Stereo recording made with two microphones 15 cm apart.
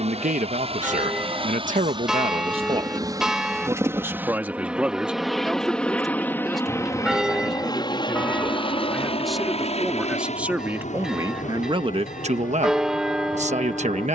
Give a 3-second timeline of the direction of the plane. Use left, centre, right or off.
right, centre, left, left, left.